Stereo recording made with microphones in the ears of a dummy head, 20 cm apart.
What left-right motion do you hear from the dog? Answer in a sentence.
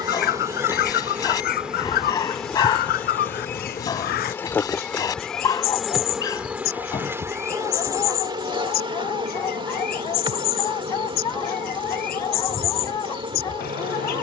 In this clip you hear the dog stay put.